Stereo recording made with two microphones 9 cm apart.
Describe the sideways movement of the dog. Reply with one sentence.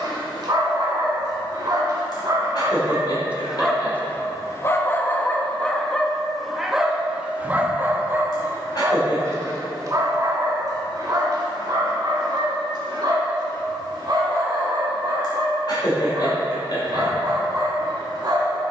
In this clip you hear the dog go left and come back.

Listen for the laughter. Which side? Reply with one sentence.
You can hear the laughter on the left.